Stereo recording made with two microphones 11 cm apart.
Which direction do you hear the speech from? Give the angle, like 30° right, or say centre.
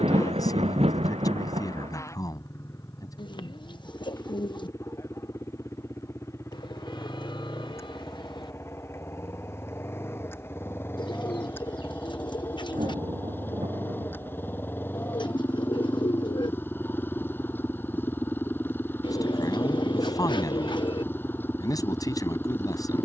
30° left.